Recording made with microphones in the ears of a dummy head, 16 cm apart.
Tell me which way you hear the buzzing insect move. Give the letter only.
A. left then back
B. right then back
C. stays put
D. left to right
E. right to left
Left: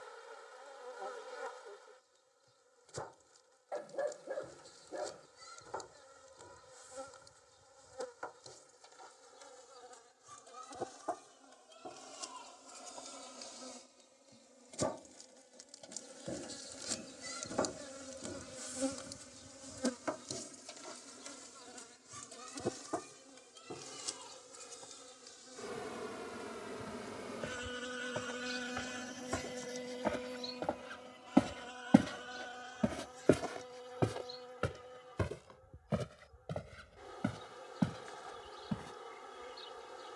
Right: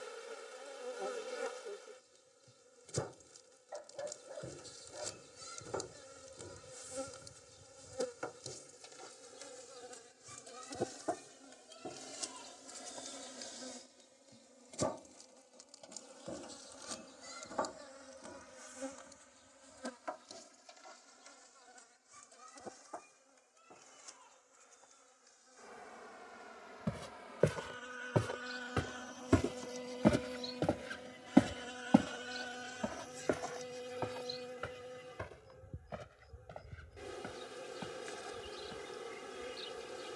A.